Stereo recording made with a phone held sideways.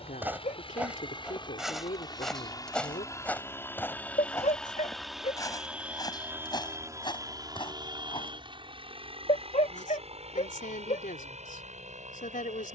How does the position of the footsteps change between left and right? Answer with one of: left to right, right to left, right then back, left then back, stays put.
right to left.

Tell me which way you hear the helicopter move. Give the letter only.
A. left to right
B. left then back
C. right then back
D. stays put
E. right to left
A.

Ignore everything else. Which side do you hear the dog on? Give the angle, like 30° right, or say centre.
60° left.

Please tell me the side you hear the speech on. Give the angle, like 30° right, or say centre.
80° left.